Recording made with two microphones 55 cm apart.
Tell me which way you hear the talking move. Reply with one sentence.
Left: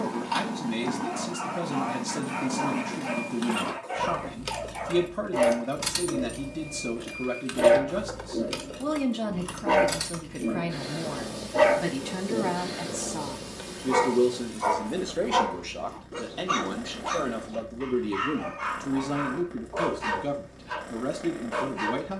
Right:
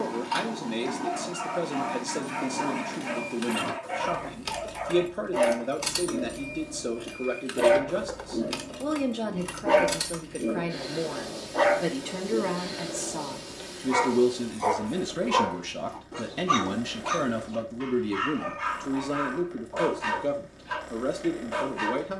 You can hear the talking move from left to right and back again.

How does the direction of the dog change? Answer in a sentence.
In this clip you hear the dog go left and come back.